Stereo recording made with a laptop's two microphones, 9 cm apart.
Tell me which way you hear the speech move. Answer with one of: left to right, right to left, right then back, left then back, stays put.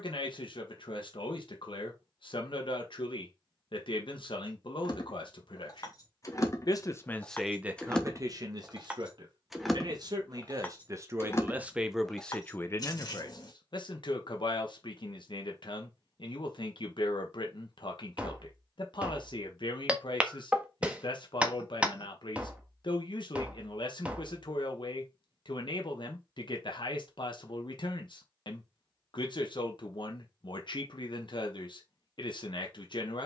right then back.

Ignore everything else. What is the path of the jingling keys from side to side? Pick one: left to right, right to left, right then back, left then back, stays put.
right then back.